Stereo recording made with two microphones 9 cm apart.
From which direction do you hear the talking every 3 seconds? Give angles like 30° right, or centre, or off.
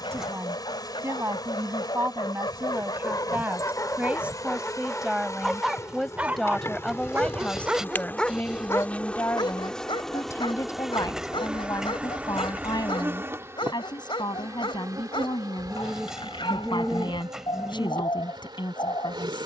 30° right, 10° right, 10° left, 40° left, 50° left, 60° left, 60° left.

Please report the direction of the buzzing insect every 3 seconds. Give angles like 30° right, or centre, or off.
50° left, 40° left, 20° left, centre, 30° right, 50° right, 60° right.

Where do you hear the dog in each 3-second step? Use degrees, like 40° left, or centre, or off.
70° left, 20° left, 10° right, 70° left, 70° left, 70° left, 70° left.